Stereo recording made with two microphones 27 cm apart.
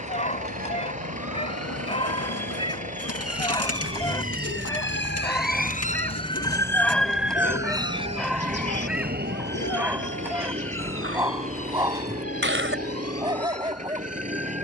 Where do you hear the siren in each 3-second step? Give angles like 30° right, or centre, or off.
70° left, 50° left, 10° right, 50° right, 60° right.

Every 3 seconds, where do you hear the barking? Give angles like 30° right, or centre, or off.
20° left, 10° left, centre, 10° right, 20° right.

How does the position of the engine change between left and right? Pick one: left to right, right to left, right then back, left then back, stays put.
stays put.